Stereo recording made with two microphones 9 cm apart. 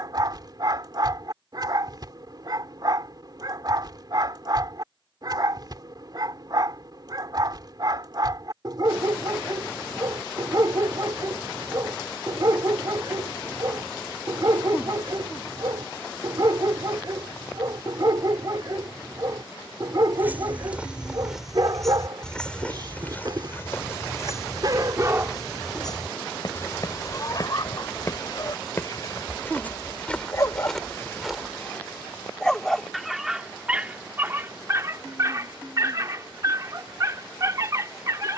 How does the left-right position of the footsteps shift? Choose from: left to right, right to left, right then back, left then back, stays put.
left then back.